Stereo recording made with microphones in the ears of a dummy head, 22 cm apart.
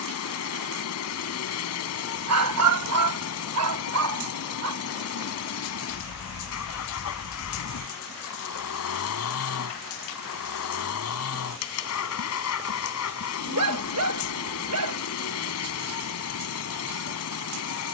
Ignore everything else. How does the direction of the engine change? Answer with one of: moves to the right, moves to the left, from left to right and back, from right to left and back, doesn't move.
doesn't move.